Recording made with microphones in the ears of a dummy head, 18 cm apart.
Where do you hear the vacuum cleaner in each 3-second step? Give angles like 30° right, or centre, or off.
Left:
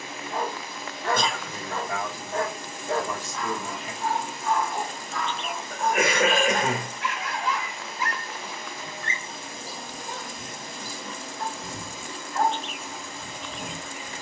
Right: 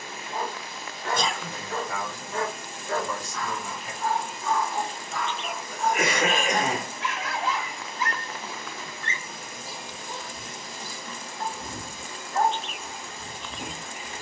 60° left, 40° left, centre, 40° left, 60° left.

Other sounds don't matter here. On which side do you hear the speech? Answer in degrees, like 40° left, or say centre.
60° left.